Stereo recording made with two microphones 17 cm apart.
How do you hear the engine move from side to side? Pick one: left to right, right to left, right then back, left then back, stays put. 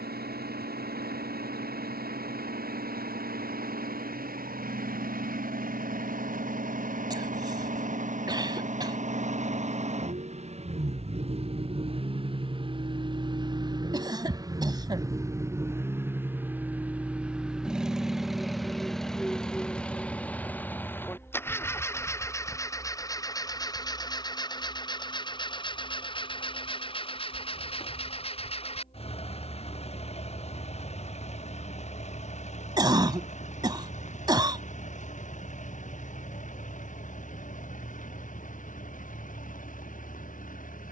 right to left.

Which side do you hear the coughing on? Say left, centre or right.
right.